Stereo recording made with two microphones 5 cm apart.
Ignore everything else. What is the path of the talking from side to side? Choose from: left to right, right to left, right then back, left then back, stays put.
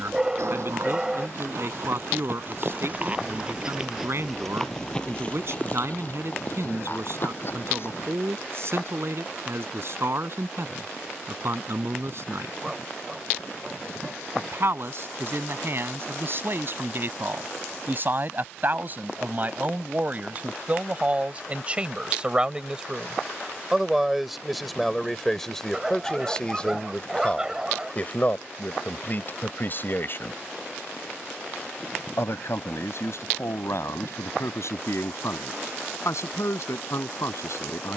right to left.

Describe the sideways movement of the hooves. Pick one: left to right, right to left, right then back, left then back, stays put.
right to left.